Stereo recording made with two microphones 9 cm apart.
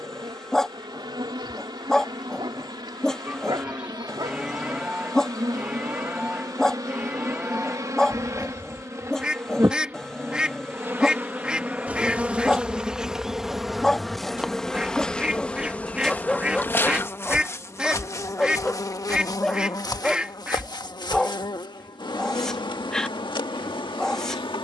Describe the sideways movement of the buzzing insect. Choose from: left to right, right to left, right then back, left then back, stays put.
right to left.